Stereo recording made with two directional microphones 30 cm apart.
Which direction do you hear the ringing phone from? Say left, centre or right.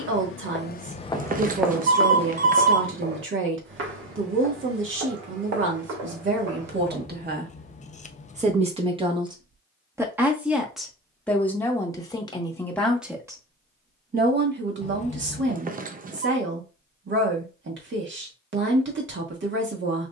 right.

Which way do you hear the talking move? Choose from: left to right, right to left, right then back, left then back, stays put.
left then back.